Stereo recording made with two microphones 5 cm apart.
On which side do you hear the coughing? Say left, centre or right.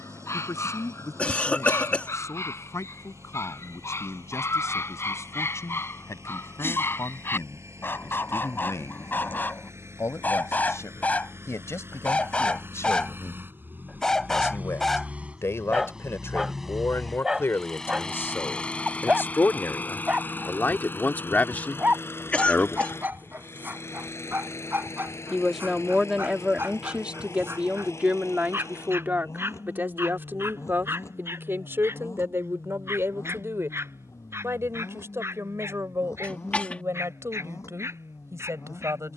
left.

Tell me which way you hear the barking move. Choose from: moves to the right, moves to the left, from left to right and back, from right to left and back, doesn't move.
moves to the right.